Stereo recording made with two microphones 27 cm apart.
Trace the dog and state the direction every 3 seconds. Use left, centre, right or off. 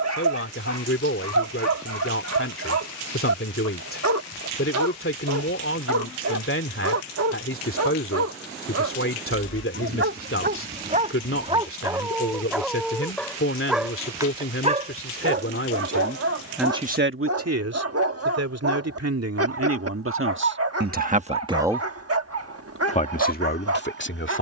right, right, right, right, centre, right, right, right.